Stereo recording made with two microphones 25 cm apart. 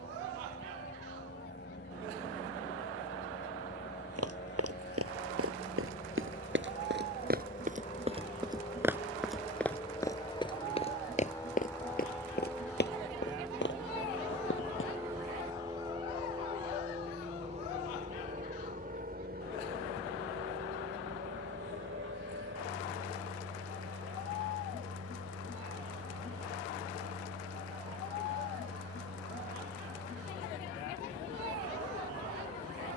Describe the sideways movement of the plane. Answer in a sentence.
In this clip you hear the plane go from the left side to the right.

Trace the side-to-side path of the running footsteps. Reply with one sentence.
In this clip you hear the running footsteps move from right to left.